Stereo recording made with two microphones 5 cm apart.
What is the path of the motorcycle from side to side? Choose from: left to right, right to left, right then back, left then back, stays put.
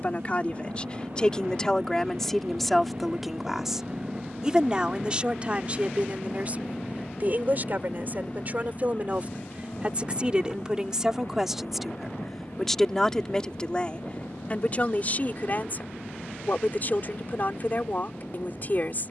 right to left.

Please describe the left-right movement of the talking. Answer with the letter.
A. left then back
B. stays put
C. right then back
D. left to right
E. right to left
C.